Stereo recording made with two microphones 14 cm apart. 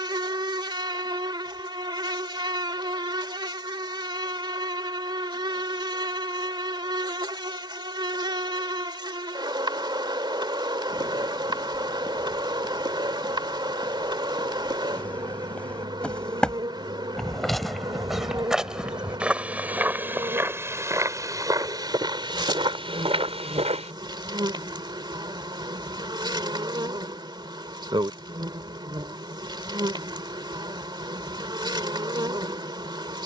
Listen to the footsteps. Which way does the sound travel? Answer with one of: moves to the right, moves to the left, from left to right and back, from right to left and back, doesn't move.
moves to the right.